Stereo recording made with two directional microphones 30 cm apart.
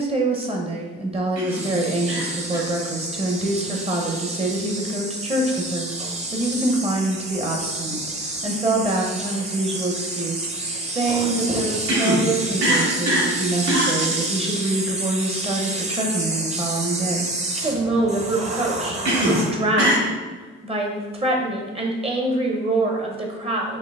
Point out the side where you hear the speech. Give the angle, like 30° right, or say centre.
20° right.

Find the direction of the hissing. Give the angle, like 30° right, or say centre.
20° right.